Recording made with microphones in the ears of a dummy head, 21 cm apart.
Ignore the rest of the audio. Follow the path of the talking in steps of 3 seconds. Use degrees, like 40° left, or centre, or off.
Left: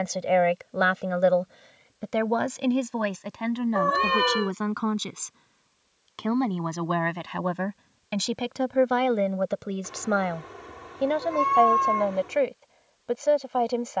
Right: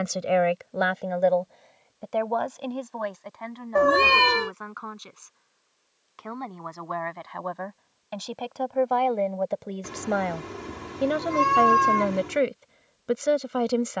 20° left, 50° left, 40° left, centre, 30° right.